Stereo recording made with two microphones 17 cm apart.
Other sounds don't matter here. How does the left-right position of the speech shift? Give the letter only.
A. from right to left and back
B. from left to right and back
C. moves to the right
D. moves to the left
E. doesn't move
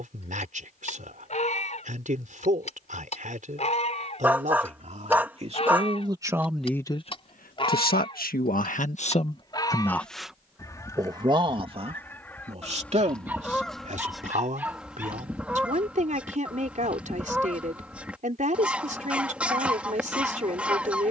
A.